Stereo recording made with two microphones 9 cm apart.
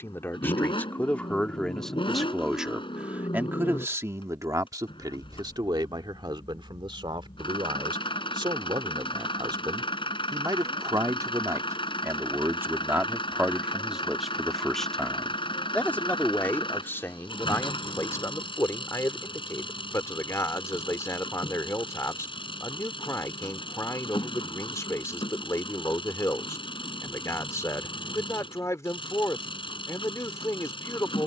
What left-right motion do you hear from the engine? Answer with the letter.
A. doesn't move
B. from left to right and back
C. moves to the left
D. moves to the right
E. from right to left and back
A.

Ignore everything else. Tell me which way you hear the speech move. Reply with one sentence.
In this clip you hear the speech go right and come back.